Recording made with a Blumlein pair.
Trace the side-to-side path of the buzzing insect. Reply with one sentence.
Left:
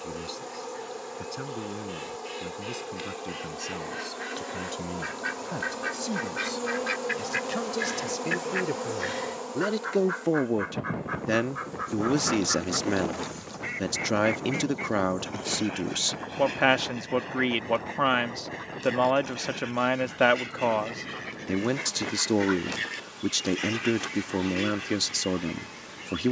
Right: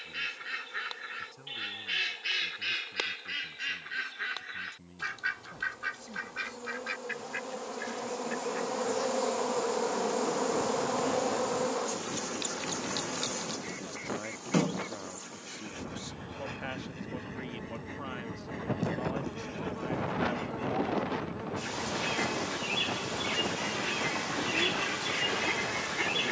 In this clip you hear the buzzing insect move from left to right.